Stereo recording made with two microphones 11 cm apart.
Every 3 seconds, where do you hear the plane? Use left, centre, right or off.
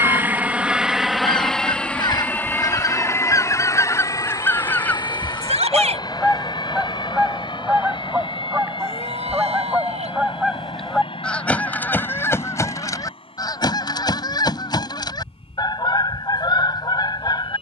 centre, left, left, left, left, left.